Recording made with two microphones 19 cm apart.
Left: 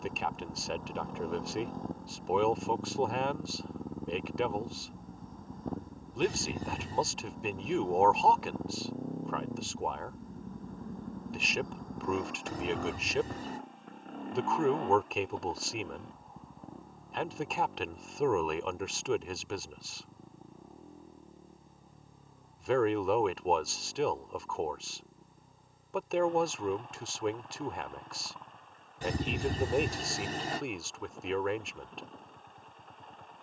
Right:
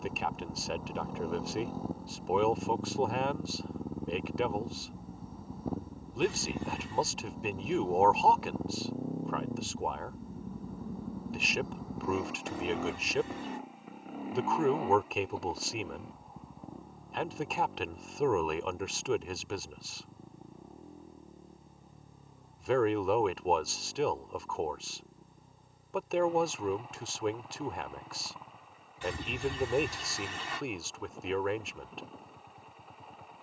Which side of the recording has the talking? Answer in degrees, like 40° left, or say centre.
centre.